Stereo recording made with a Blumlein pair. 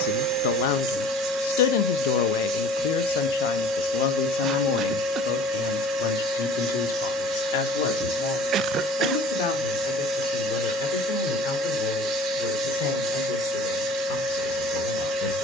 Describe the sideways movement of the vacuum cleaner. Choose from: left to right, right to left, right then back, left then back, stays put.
stays put.